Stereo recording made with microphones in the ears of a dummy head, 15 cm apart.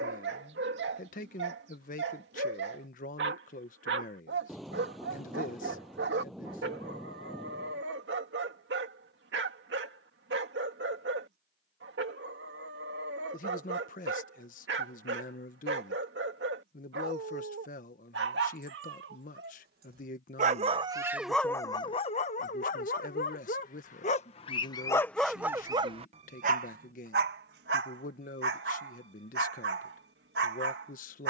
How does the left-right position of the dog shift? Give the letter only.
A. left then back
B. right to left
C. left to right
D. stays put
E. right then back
A.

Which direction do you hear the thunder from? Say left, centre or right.
centre.